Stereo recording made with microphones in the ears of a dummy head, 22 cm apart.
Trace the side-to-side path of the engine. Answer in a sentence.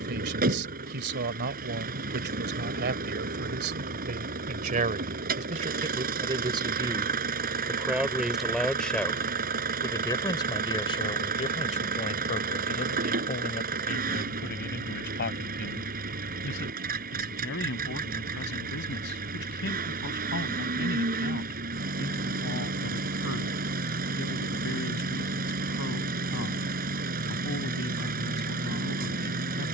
In this clip you hear the engine stay in one place.